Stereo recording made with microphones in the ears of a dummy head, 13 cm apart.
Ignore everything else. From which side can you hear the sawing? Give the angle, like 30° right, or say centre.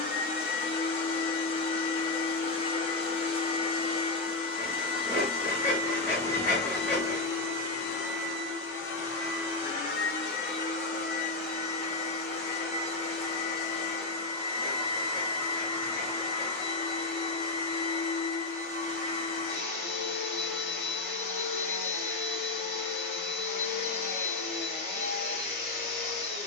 10° left.